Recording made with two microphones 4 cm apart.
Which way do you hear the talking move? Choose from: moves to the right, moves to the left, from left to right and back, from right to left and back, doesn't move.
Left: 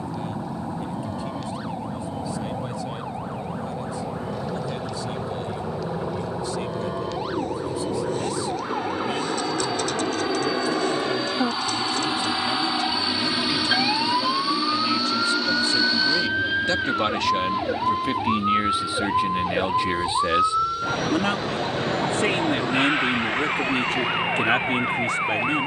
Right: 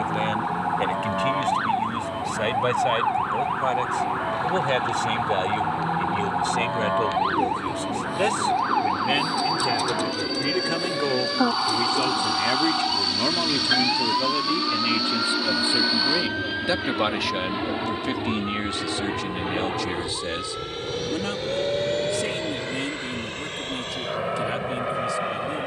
moves to the left.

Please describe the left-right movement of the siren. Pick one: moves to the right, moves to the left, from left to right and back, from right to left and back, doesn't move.
moves to the left.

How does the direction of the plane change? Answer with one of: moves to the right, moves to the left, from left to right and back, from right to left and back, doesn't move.
moves to the right.